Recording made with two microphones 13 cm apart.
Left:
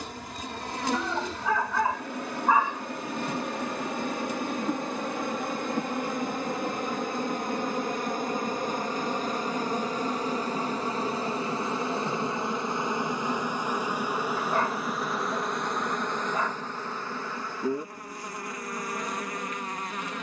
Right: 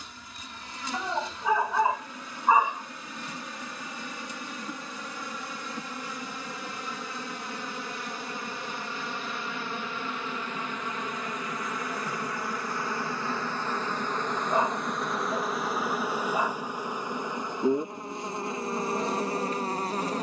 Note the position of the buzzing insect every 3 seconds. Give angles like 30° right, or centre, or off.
70° left, 60° left, 50° left, 40° left, 20° left, 10° right, 30° right.